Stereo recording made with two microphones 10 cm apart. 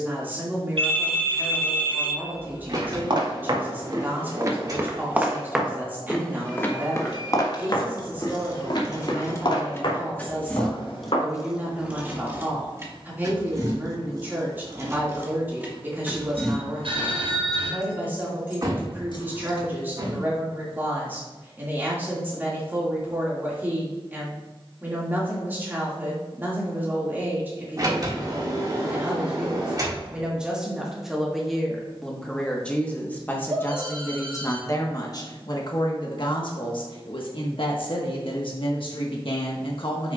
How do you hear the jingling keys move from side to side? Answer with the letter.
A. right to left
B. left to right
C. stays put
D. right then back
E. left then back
D.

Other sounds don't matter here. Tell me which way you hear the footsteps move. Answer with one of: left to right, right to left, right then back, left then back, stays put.
right to left.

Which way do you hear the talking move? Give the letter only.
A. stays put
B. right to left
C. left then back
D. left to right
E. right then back
B.